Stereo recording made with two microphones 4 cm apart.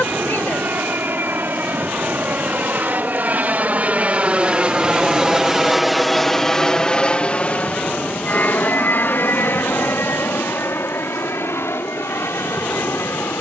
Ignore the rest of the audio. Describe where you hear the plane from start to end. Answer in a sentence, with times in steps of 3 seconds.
In this clip you hear the plane on the right from 0 s and on the left from 6 s.